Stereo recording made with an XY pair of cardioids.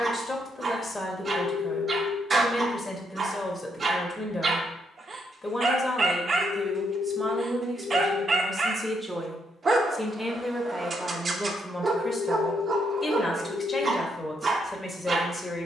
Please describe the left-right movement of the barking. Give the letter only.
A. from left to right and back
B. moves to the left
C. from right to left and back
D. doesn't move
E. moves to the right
D.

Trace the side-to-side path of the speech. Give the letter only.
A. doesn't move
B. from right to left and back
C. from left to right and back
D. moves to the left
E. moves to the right
C.